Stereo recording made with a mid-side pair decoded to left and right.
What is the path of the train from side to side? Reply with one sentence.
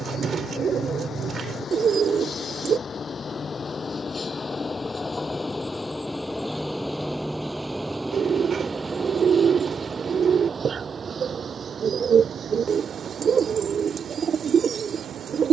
You can hear the train travel towards the right.